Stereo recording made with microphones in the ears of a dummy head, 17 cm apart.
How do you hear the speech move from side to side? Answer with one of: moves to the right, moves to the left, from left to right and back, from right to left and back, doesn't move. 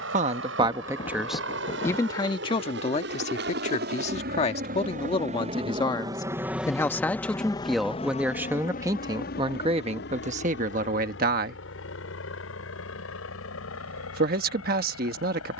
from right to left and back.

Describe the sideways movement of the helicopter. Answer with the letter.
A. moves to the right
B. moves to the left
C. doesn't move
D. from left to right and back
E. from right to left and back
B.